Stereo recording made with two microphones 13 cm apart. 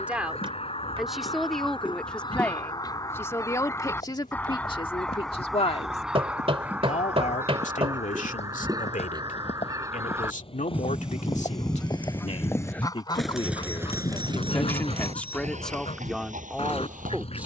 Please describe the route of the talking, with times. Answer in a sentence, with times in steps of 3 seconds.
You can hear the talking in the centre from 0 s, on the left from 3 s and in the centre from 15 s.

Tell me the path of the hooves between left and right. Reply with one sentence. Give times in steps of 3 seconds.
You can hear the hooves not at all from 0 s, on the left from 3 s, in the centre from 12 s and on the right from 15 s.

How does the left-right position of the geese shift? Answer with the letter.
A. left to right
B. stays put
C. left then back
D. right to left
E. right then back
E.